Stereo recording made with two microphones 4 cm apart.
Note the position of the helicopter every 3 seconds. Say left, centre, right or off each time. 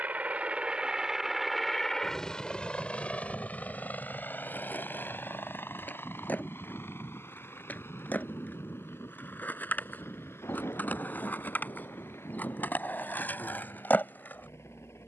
centre, left, left, left, left.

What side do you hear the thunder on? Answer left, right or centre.
left.